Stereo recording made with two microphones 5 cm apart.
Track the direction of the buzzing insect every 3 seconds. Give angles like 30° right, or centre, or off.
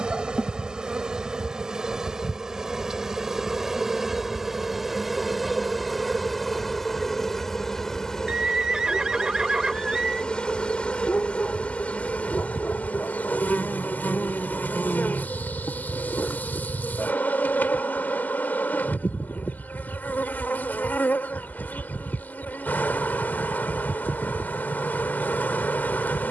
10° right, 10° right, 10° left, 20° left, 30° left, 40° left, 40° left, 40° left, 40° left.